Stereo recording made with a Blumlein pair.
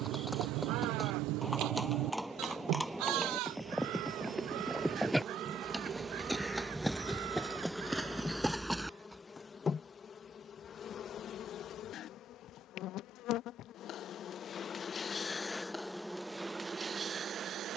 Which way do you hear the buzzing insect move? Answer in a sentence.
In this clip you hear the buzzing insect move from right to left and back again.